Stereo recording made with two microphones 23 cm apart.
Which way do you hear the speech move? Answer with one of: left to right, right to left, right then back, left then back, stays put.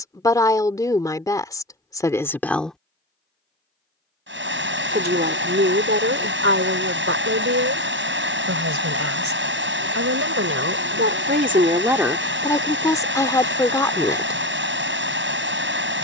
right then back.